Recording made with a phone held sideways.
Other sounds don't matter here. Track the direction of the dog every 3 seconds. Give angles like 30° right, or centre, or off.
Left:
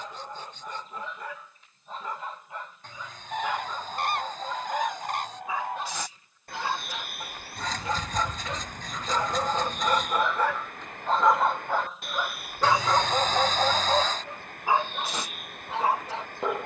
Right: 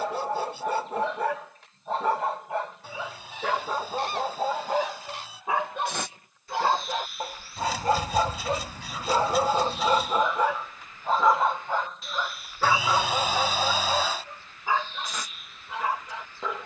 80° right, 70° right, 50° right, 10° right, 20° left, 30° left.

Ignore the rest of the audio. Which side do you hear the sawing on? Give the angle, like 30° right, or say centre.
10° right.